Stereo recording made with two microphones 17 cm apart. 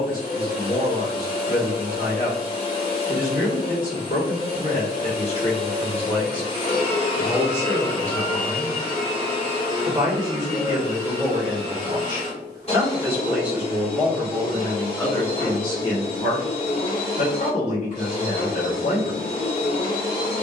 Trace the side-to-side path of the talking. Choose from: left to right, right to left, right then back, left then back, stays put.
right then back.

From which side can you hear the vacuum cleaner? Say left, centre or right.
left.